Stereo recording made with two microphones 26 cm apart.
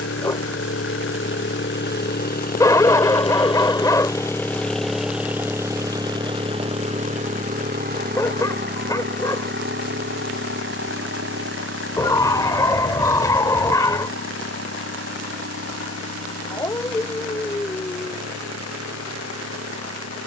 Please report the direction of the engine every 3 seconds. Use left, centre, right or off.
left, centre, right, right, right, right, right.